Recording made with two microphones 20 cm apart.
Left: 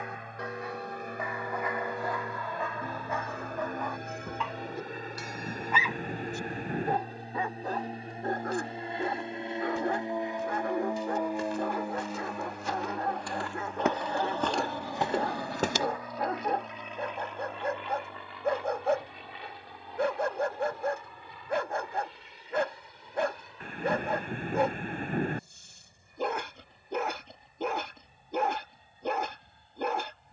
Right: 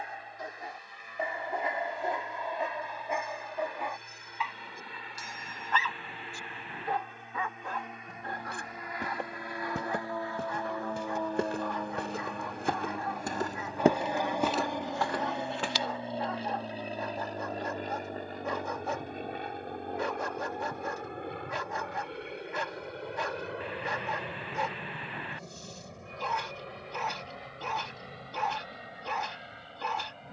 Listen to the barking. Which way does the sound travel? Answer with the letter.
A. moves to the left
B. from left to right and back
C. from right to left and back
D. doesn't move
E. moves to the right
A.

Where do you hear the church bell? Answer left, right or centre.
left.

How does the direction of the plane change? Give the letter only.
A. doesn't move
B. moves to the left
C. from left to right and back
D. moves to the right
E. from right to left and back
D.